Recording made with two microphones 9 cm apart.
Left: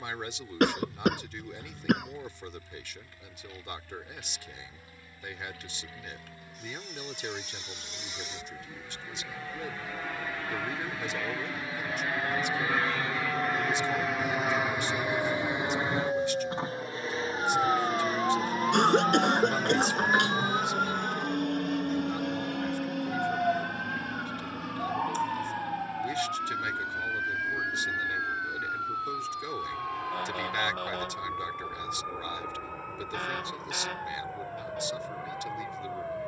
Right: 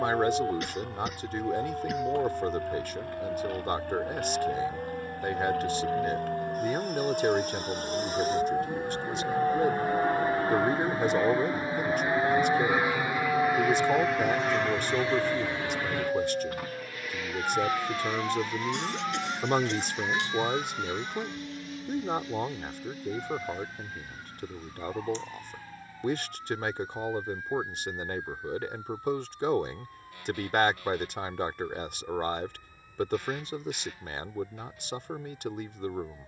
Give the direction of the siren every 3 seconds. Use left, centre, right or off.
right, right, right, right, right, centre, left, left, left, left, left, left.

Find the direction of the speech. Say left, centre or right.
right.